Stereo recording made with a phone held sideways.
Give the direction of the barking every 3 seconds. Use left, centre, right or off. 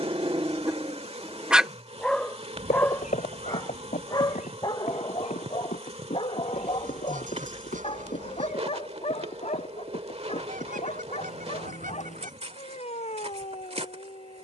centre, left, left, left, left.